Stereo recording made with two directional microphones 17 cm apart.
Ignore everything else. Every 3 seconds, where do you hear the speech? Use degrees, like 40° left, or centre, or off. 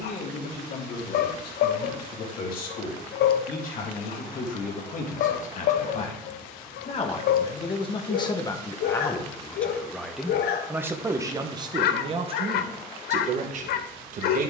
60° left, 50° left, 30° left, 10° right, 40° right.